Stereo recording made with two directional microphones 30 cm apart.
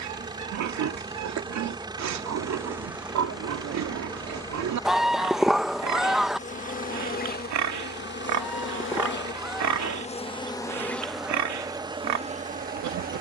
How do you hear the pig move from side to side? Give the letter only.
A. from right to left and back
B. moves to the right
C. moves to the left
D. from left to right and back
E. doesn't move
E.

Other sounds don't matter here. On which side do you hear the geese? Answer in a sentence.
You can hear the geese in the centre.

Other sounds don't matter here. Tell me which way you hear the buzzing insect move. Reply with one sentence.
You can hear the buzzing insect go left and come back.